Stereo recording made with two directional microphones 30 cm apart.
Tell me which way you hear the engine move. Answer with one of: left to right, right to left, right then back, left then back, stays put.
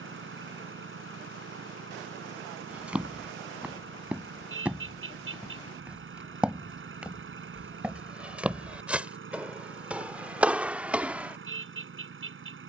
stays put.